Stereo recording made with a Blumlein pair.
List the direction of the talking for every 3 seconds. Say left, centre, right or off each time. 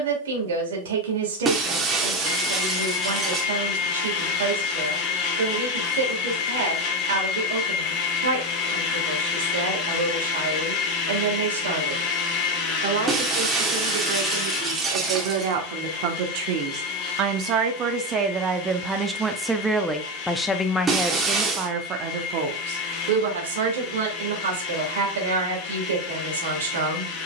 right, right, right, right, right, right, centre, right, right.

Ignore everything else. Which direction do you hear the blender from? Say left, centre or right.
left.